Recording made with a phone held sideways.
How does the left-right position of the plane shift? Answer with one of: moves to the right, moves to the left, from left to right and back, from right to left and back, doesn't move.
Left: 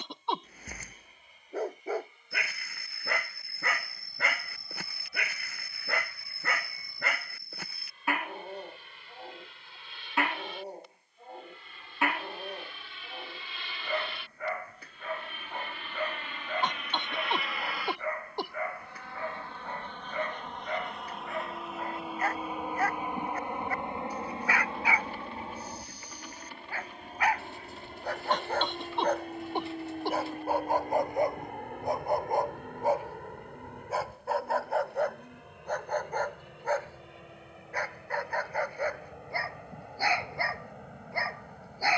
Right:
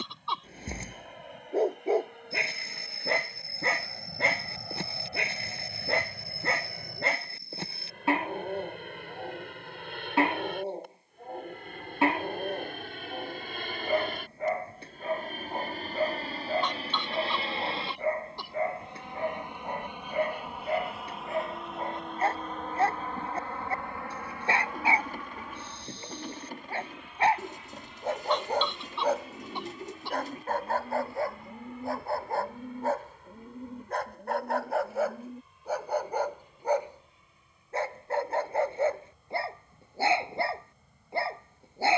moves to the left.